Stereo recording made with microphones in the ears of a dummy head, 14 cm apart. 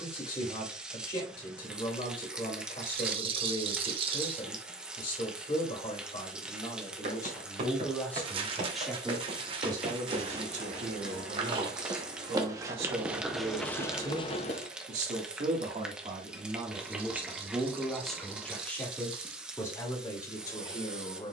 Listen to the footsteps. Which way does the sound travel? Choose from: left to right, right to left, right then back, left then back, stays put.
right to left.